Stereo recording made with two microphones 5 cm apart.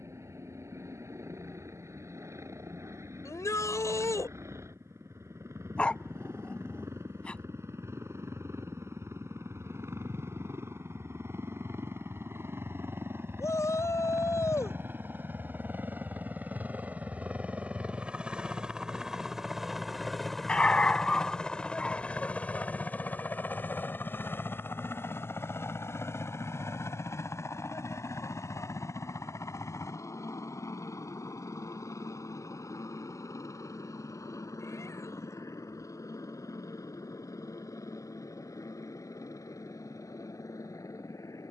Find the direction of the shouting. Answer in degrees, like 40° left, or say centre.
70° left.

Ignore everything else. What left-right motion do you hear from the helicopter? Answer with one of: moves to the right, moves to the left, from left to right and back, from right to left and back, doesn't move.
moves to the left.